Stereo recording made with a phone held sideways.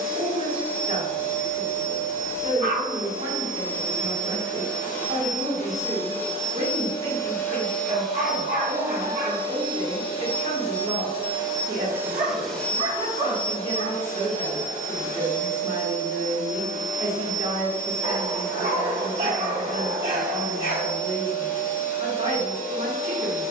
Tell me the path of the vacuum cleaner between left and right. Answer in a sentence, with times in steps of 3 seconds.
You can hear the vacuum cleaner on the left from 0 s, in the centre from 6 s, on the right from 9 s and on the left from 12 s.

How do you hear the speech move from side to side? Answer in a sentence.
In this clip you hear the speech stay in one place.